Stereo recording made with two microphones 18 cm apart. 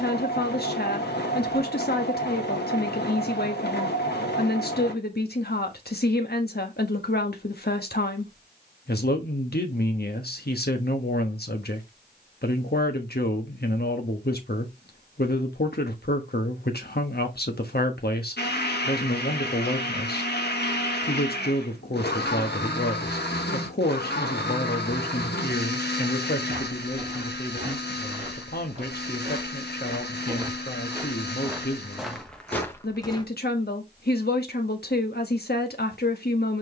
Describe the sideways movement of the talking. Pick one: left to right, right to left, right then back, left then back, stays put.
stays put.